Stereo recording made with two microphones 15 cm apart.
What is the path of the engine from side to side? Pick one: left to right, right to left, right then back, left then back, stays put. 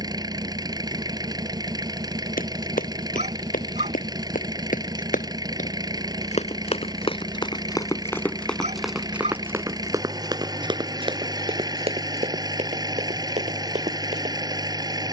stays put.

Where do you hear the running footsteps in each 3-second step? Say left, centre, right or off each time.
left, left, left, right, right.